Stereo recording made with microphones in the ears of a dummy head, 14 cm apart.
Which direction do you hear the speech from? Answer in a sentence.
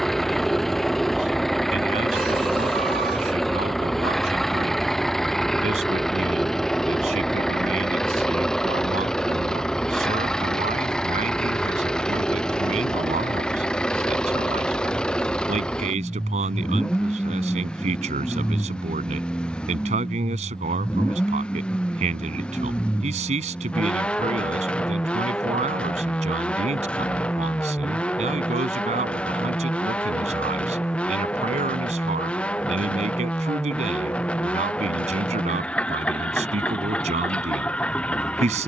You can hear the speech on the right.